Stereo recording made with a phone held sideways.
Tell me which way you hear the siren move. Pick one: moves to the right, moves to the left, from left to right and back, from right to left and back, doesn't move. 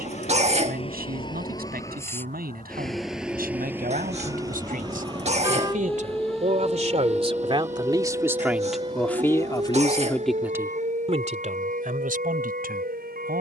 moves to the right.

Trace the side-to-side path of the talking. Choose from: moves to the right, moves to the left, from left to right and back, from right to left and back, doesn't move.
from right to left and back.